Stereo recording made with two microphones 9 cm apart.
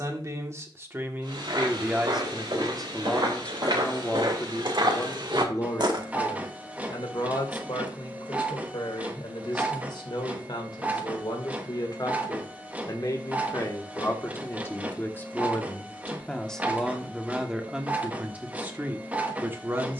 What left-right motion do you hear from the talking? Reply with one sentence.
You can hear the talking move from right to left and back again.